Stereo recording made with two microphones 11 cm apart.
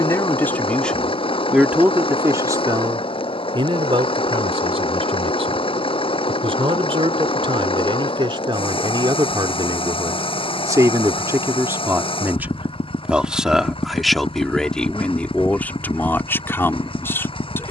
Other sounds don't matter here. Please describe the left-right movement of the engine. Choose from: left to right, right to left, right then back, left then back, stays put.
stays put.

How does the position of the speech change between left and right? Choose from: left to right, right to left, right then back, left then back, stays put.
right then back.